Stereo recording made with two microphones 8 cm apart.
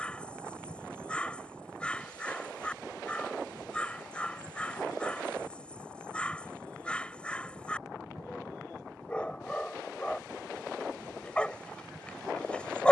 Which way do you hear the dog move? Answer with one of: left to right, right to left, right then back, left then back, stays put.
stays put.